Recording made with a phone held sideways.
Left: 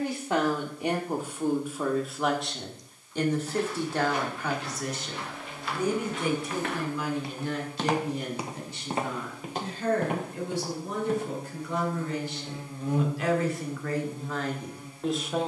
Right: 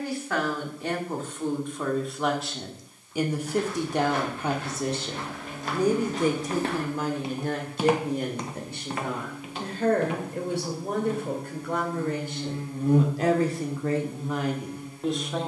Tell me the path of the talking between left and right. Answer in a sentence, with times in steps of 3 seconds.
You can hear the talking in the centre from 0 s and on the right from 3 s.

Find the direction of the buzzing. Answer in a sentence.
You can hear the buzzing on the right.